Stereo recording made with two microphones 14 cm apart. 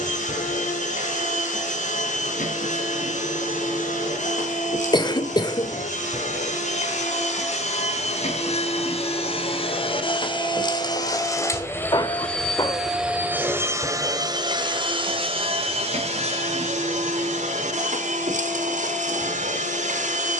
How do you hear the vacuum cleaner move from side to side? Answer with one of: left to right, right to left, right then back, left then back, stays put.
left to right.